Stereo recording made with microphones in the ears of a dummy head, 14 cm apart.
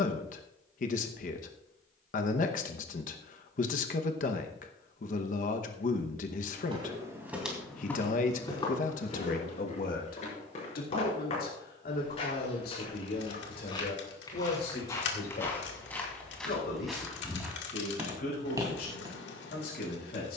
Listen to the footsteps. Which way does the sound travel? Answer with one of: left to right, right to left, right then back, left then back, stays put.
left then back.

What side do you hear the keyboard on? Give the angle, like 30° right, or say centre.
80° left.